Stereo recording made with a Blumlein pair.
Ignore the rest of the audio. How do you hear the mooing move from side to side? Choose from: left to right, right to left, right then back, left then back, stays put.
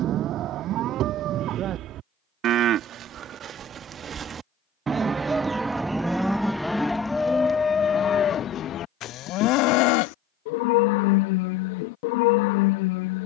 right to left.